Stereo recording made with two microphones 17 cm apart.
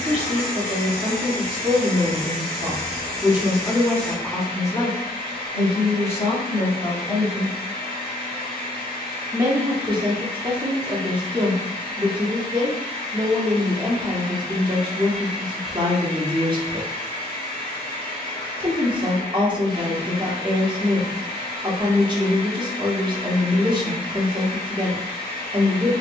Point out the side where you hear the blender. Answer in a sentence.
You can hear the blender on the left.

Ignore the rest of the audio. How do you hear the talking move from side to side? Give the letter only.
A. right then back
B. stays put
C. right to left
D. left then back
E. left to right
D.